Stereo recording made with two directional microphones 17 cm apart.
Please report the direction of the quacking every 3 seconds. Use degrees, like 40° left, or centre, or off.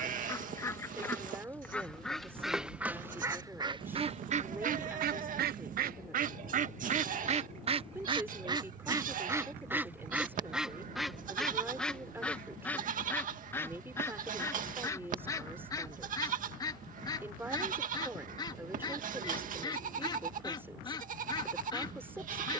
10° left, 40° right, 40° right, centre, 10° left, 20° left, 30° left, 30° left.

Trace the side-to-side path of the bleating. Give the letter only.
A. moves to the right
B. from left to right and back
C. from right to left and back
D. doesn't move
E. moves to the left
D.